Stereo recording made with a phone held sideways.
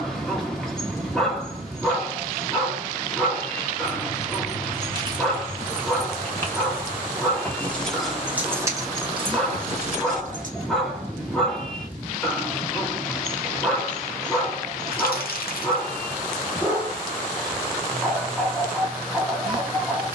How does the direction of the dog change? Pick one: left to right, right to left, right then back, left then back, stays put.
stays put.